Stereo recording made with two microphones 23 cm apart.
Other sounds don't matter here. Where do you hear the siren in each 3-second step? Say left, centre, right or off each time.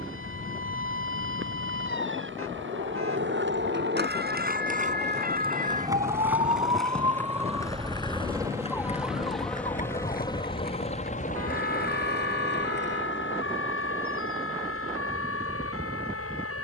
right, right, centre, left, left, left.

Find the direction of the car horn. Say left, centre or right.
right.